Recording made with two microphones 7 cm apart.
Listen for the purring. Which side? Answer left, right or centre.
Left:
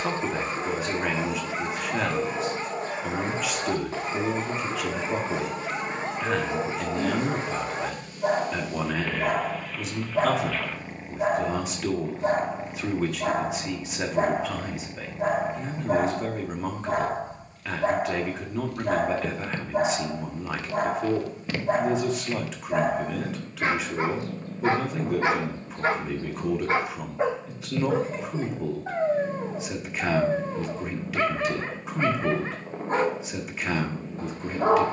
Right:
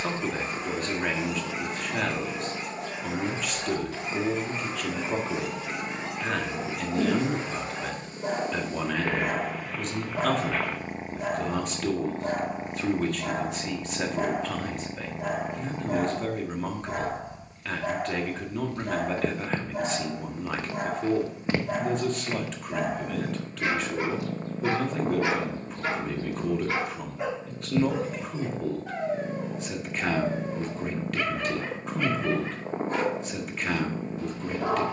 right.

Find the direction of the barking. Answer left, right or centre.
left.